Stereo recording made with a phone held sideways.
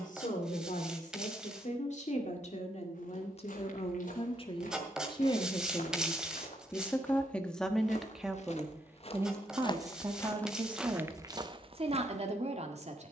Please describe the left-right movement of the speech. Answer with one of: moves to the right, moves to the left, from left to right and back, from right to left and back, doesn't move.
moves to the right.